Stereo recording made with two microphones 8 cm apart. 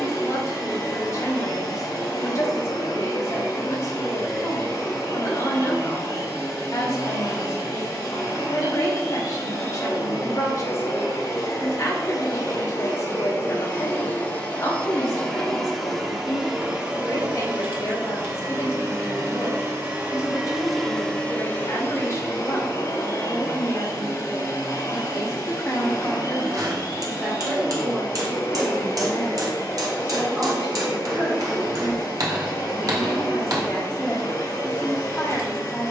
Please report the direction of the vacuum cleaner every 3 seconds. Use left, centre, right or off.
left, left, left, left, left, centre, right, left, left, left, left, left.